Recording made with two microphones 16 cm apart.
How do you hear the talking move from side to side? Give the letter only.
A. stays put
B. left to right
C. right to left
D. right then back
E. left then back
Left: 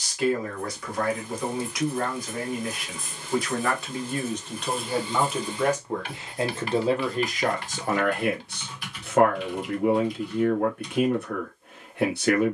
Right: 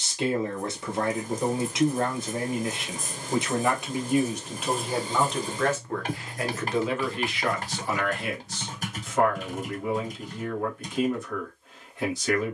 C.